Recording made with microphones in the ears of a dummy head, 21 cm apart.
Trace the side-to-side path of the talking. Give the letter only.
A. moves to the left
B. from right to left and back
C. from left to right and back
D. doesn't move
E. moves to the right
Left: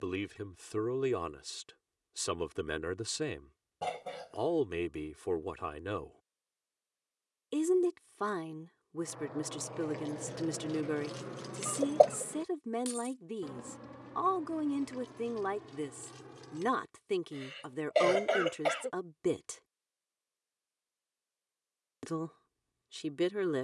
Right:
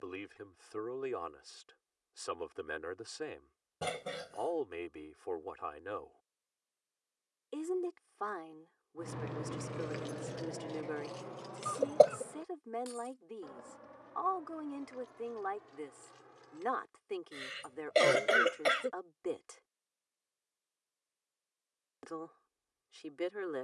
D.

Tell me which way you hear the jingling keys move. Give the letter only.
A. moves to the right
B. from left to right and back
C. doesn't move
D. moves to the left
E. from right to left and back
D.